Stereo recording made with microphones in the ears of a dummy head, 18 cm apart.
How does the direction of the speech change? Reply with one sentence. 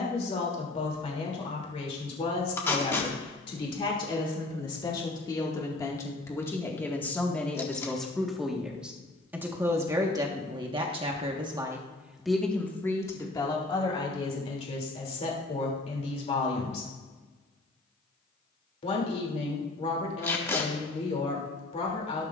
In this clip you hear the speech go right and come back.